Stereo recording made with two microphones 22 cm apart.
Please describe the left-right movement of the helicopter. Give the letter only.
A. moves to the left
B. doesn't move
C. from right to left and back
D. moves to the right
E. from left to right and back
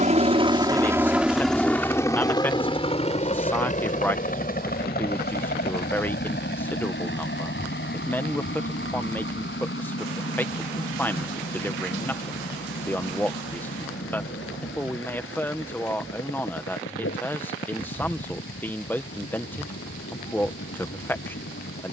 A.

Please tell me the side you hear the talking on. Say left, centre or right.
centre.